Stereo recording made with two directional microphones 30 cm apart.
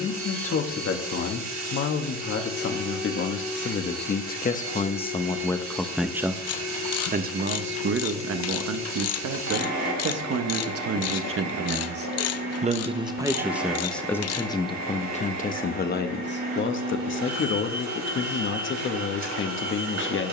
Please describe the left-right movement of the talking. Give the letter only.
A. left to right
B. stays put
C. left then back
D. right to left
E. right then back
E.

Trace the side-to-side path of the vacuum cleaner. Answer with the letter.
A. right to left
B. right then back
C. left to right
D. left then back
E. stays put
E.